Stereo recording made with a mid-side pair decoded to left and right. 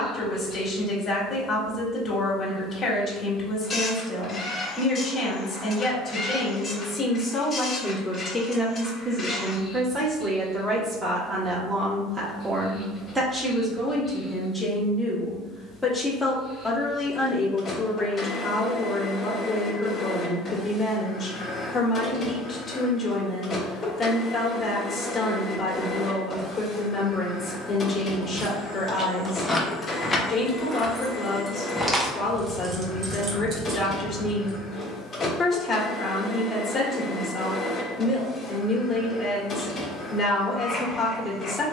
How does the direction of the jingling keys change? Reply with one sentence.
In this clip you hear the jingling keys go left and come back.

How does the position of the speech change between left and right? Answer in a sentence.
You can hear the speech move from left to right and back again.